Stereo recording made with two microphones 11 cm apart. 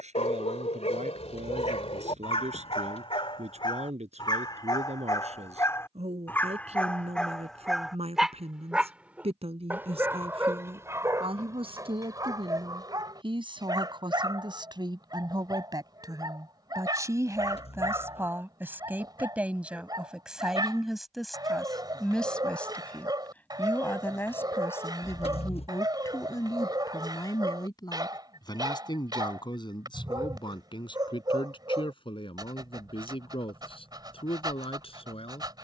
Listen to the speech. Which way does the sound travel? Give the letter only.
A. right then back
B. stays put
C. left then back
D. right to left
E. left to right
D.